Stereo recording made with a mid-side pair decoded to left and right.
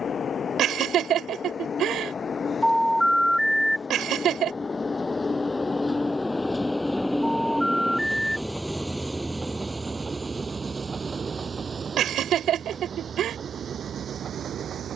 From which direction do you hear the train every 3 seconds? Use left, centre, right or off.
left, left, centre, right, right.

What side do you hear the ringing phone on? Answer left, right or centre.
centre.